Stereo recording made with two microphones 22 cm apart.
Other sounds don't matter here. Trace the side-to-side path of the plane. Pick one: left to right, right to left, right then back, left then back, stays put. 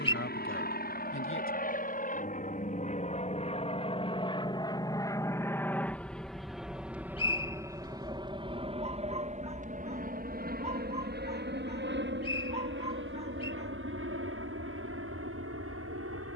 left to right.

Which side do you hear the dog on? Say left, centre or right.
right.